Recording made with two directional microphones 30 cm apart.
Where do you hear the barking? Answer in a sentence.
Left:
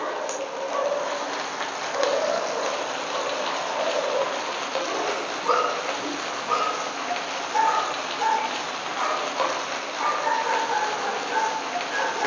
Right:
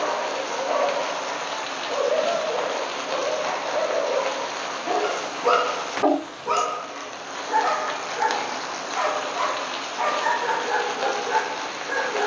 In this clip you hear the barking on the right.